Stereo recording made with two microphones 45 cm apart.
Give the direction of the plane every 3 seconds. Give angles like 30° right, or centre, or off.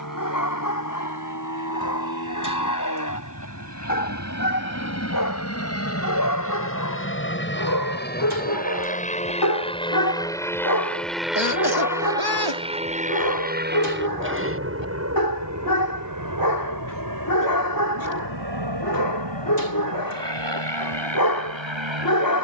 50° left, 40° left, 30° left, 10° left, 20° right, 40° right, 60° right, 70° right.